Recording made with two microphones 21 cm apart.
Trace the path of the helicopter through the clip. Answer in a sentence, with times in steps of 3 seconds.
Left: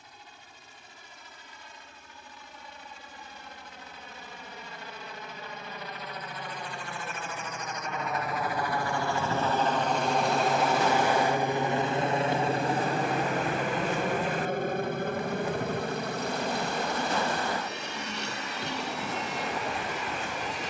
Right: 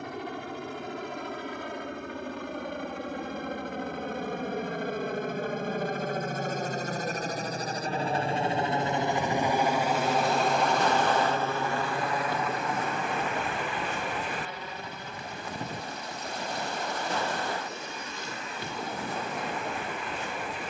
In this clip you hear the helicopter on the right from 0 s, in the centre from 9 s and on the left from 12 s.